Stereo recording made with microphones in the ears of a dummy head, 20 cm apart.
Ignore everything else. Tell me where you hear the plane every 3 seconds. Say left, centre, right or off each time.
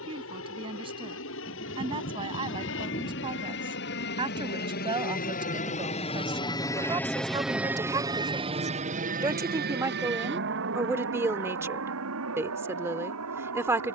left, left, centre, right, right.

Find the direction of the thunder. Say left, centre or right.
left.